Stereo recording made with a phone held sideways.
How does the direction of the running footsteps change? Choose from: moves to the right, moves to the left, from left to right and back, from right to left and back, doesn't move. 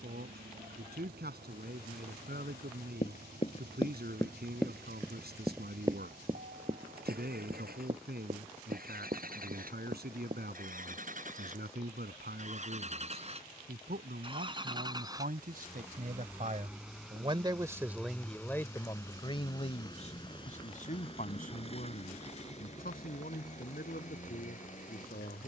moves to the right.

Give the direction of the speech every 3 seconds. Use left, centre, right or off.
right, right, right, right, right, right, left, left, left.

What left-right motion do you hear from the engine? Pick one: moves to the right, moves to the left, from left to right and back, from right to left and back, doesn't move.
moves to the left.